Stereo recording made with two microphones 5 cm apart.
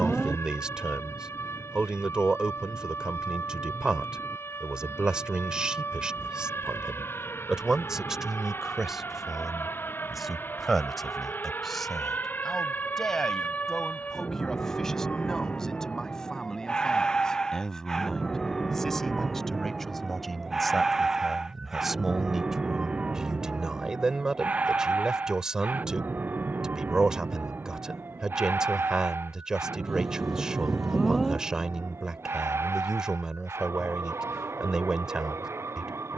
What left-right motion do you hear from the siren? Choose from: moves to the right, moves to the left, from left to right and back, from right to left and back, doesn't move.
moves to the right.